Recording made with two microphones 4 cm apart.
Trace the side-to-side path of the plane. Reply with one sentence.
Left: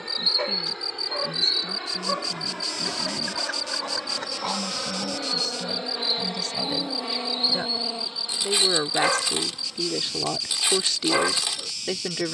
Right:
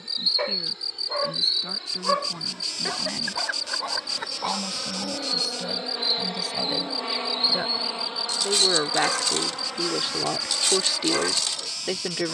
You can hear the plane move to the right.